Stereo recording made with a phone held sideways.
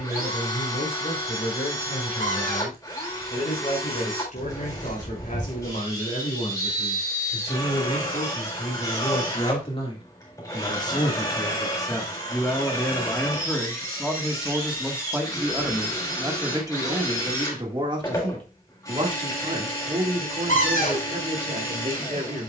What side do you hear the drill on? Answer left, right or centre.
left.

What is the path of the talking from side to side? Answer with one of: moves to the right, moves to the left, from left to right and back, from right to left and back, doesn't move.
moves to the right.